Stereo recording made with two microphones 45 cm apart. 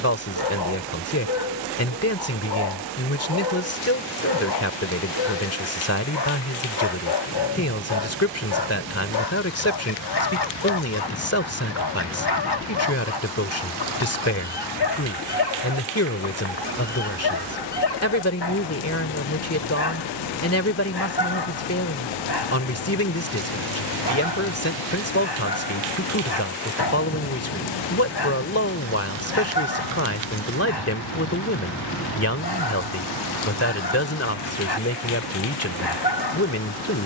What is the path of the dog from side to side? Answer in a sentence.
In this clip you hear the dog stay put.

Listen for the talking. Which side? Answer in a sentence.
In this clip you hear the talking on the left.